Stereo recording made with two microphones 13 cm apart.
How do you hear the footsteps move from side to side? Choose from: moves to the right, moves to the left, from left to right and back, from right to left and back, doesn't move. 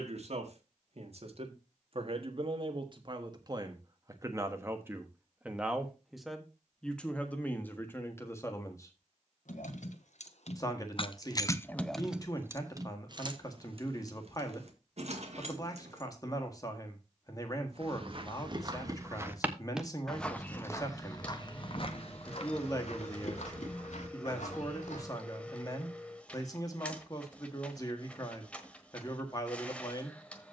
moves to the left.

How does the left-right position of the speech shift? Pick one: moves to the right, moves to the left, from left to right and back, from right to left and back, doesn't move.
moves to the left.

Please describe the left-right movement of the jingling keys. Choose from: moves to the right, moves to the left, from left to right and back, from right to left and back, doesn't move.
moves to the right.